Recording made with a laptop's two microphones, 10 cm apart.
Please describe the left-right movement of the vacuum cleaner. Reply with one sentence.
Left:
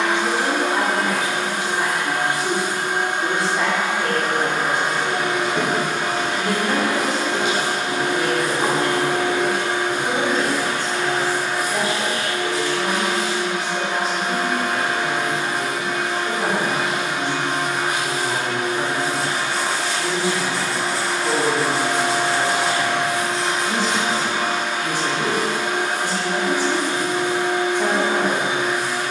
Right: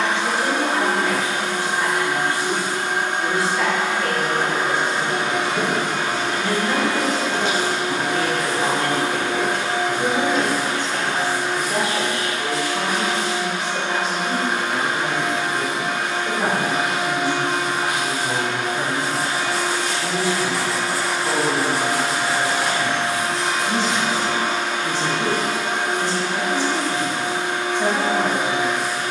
In this clip you hear the vacuum cleaner go right and come back.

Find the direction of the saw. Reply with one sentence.
You can hear the saw in the centre.